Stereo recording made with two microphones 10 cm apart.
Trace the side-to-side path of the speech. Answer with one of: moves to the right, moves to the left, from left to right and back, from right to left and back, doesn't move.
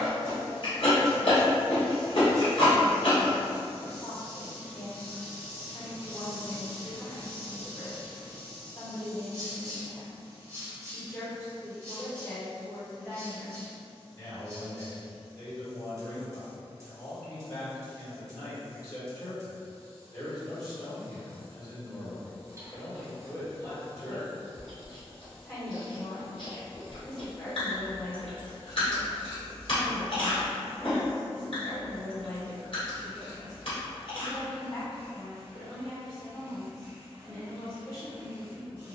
doesn't move.